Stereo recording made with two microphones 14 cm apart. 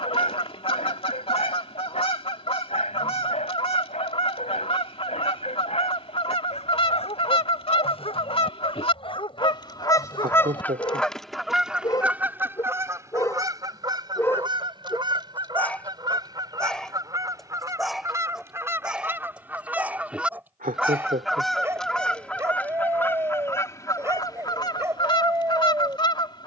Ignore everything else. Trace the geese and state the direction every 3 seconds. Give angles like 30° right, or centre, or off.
40° left, 40° left, 40° left, 10° left, 20° right, 30° right, 10° right, 10° left, 30° left.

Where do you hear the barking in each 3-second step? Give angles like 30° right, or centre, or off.
50° left, 50° left, 40° left, 30° left, 20° left, 10° left, 10° right, 20° right, 20° right.